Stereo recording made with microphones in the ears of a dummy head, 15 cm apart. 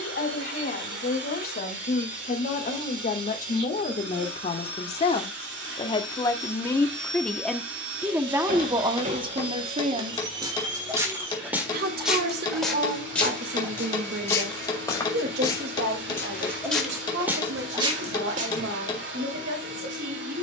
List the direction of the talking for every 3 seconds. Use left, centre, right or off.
left, left, centre, right, right, right, right.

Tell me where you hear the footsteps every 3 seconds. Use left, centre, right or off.
off, off, right, right, centre, centre, right.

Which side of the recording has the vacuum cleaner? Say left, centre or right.
right.